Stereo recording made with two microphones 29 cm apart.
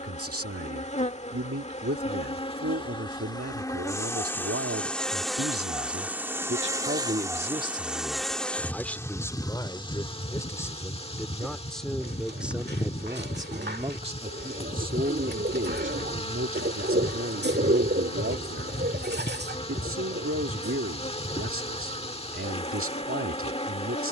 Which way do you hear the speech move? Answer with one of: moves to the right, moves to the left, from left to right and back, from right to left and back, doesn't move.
from right to left and back.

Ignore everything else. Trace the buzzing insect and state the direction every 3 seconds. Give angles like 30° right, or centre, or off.
20° left, 10° left, centre, 20° left, 20° left, 20° left, 20° left, 20° left.